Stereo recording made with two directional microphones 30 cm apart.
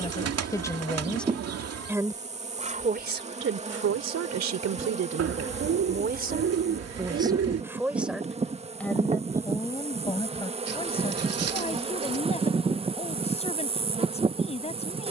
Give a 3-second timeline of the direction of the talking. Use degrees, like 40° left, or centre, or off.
centre, 50° right, 10° right, 10° left, 20° left.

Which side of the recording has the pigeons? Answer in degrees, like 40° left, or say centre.
50° right.